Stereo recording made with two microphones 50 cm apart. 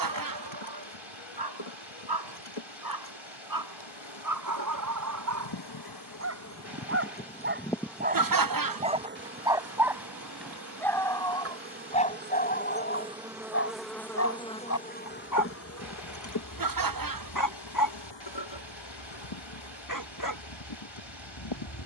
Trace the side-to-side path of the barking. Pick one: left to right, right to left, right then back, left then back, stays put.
right to left.